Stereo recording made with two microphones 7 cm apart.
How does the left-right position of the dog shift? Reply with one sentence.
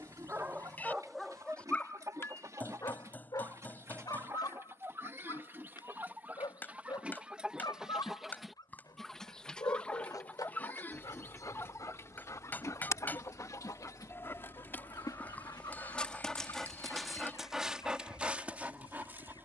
In this clip you hear the dog move from right to left and back again.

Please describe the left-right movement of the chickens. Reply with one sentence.
You can hear the chickens move to the left.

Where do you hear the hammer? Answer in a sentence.
In this clip you hear the hammer on the left.